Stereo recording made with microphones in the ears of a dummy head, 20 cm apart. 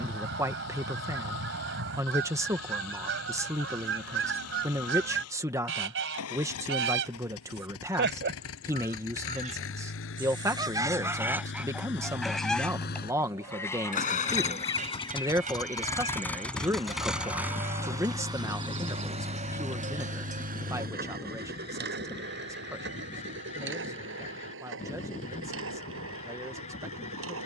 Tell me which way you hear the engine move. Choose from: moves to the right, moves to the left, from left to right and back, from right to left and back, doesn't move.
moves to the right.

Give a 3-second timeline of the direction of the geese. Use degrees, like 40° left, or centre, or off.
60° right, 60° right, 50° right, 20° right, 10° left, 20° left, 30° left, 30° left, 30° left.